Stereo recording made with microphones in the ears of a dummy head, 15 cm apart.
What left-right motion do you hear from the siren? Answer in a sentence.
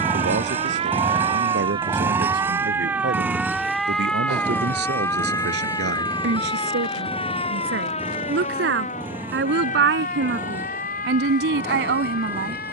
You can hear the siren move to the left.